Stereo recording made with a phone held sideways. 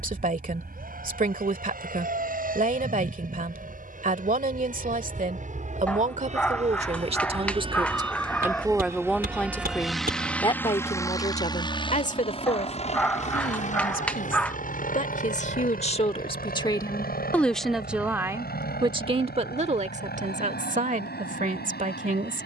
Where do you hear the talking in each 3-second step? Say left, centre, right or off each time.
right, right, right, left, left, left, right, right.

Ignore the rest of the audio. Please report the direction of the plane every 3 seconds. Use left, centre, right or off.
right, right, right, centre, left, left, left, left.